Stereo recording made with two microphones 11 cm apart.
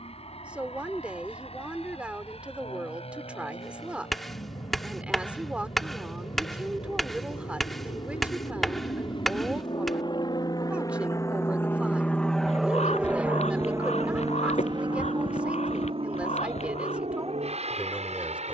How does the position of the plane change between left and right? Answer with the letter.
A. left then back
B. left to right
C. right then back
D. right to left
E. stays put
B.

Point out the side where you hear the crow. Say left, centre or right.
left.